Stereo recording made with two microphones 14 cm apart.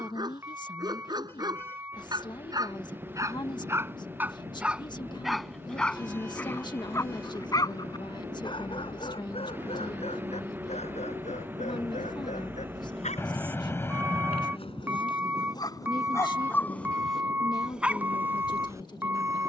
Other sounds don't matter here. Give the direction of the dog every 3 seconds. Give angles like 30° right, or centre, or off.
30° right, 10° right, 30° left, 50° left, 60° left, 20° left, 20° right.